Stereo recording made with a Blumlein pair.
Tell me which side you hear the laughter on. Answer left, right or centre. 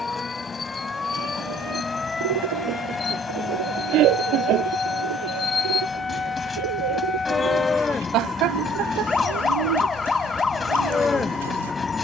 right.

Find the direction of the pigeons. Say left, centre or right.
right.